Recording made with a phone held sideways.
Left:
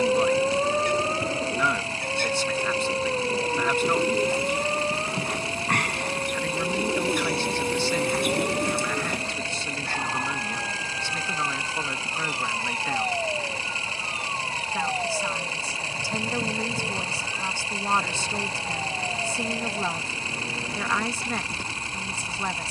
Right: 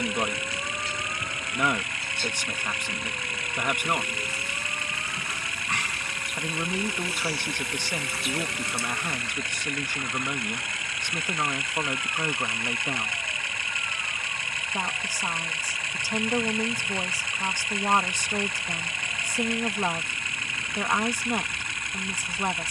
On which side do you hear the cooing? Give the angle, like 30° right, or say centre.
60° left.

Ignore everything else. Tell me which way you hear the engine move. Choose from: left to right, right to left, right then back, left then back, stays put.
stays put.